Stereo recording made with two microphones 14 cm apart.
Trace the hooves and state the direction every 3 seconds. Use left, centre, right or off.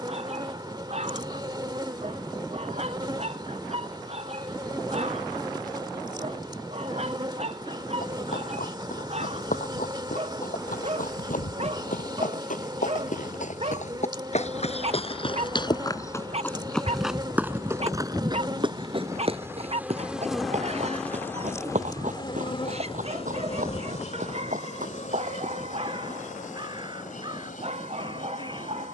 off, off, left, left, left, centre, right, right, right, off.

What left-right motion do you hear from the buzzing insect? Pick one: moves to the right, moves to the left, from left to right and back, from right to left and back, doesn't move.
moves to the left.